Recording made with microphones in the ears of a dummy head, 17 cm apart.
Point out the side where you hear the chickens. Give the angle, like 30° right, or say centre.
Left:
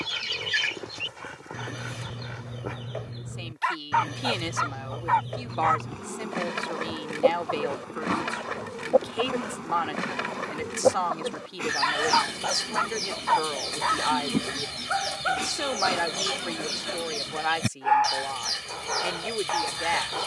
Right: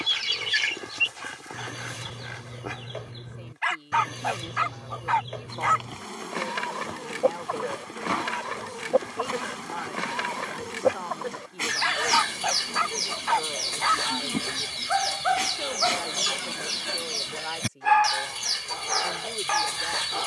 30° right.